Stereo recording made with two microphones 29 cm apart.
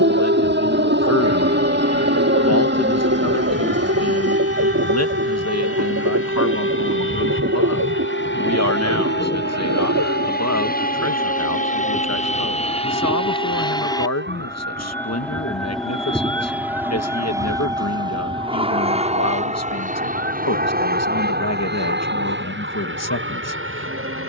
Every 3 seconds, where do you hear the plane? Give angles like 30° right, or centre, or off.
60° left, 60° left, 50° left, 30° left, 20° left, centre, 20° right, 40° right.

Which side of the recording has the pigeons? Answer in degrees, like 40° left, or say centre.
70° right.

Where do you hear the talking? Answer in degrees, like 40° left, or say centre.
70° left.